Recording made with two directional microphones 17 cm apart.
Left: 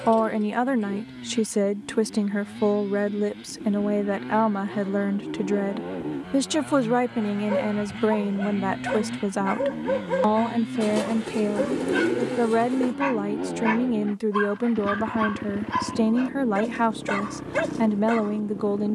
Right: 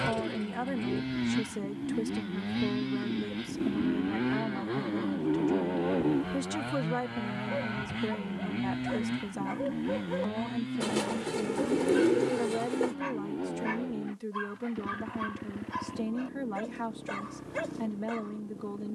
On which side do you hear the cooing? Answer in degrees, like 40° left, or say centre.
centre.